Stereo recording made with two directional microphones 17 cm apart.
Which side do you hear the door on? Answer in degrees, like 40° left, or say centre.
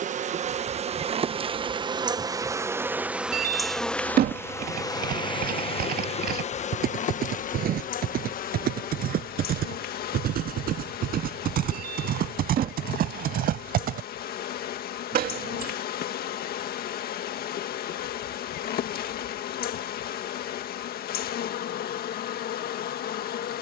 60° right.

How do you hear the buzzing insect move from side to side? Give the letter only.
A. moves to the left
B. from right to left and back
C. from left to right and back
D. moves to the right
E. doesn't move
A.